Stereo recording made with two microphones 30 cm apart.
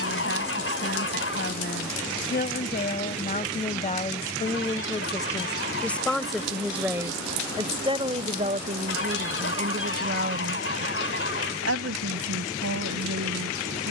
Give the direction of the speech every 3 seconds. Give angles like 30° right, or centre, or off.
40° left, 20° left, 10° right, 40° right, 60° right.